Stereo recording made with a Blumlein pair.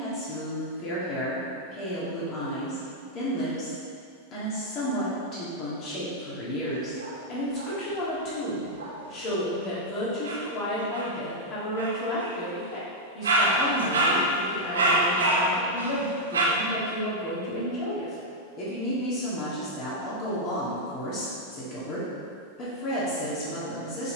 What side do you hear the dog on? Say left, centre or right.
right.